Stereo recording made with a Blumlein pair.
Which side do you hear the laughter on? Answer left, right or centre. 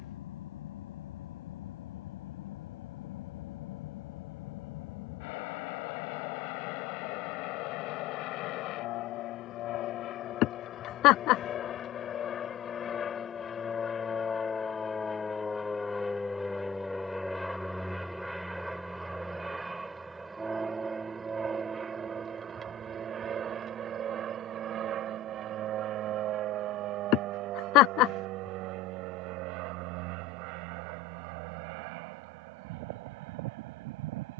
left.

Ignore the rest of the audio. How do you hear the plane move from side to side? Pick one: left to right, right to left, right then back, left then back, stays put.
left to right.